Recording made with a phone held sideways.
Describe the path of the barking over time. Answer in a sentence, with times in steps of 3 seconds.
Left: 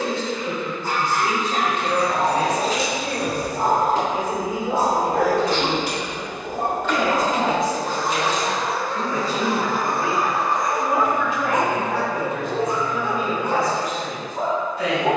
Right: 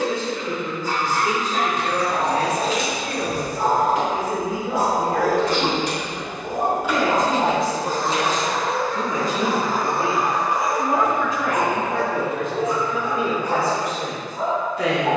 You can hear the barking on the left from 0 s, on the right from 6 s, in the centre from 9 s and on the left from 12 s.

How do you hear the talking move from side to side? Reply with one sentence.
In this clip you hear the talking travel towards the right.